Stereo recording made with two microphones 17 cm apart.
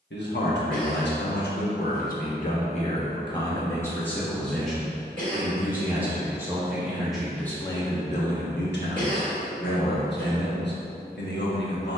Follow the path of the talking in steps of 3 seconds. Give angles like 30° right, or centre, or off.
60° left, 10° left, 20° left, 70° left.